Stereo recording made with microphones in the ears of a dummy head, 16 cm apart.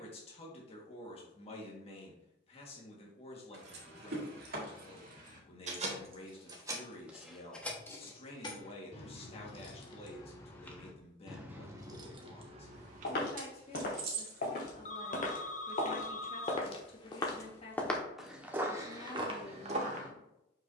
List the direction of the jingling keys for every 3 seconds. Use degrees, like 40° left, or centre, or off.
off, 60° right, centre, 10° left, 50° right, off, off.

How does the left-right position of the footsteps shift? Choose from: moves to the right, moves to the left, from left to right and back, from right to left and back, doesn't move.
moves to the right.